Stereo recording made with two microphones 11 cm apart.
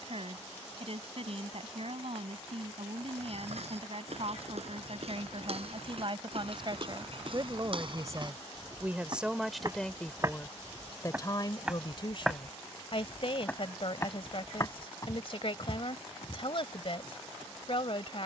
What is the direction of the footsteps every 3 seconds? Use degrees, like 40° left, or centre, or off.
off, 60° right, 50° right, 20° right, 20° left, 40° left.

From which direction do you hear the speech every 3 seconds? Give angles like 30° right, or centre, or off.
60° right, 60° right, 40° right, 20° left, 50° left, 50° left.